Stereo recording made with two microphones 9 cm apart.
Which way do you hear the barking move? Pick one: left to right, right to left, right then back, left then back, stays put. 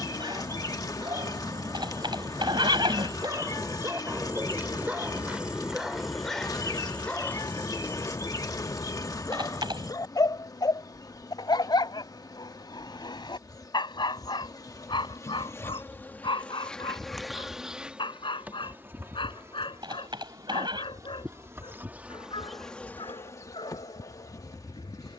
right to left.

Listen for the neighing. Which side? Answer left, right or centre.
right.